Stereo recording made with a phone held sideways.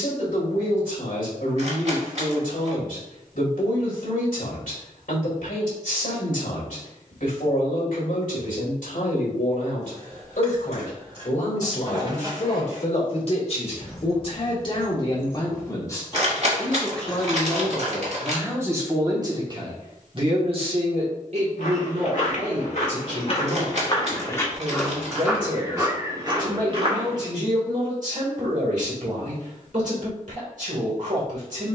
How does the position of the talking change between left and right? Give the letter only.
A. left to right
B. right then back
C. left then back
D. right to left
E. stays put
A.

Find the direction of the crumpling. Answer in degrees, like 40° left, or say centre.
50° right.